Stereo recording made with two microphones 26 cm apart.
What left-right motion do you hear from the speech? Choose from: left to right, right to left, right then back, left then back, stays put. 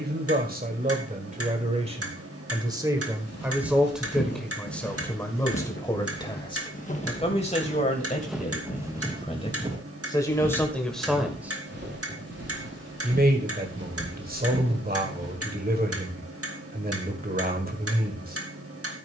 left then back.